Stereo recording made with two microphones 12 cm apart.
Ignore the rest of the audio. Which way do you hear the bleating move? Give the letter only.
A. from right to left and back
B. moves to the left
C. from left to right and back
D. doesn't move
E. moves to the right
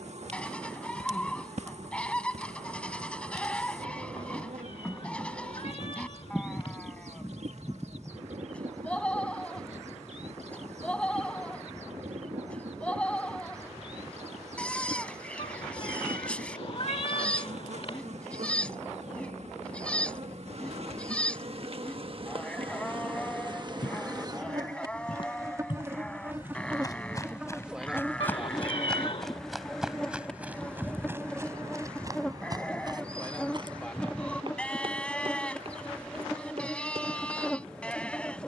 D.